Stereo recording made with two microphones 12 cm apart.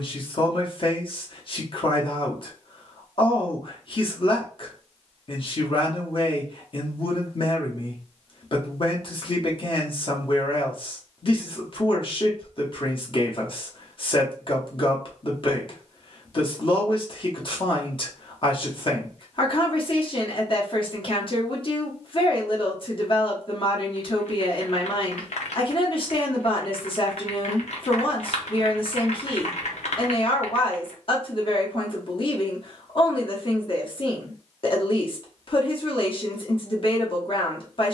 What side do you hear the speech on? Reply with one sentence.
In this clip you hear the speech on the left.